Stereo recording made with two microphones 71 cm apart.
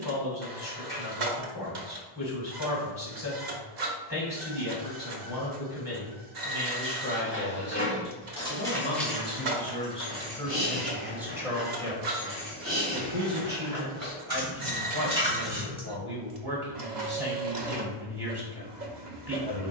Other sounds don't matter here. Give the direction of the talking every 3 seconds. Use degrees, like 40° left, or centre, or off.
30° left, 30° left, 30° left, centre, 20° right, 30° right, 30° right.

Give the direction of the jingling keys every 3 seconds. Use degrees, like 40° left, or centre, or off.
off, off, 10° left, 10° right, 30° right, centre, off.